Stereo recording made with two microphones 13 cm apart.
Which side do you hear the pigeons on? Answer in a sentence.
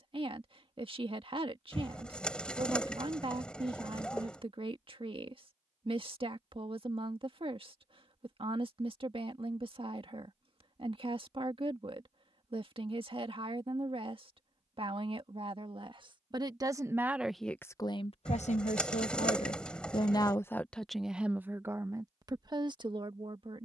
You can hear the pigeons in the centre.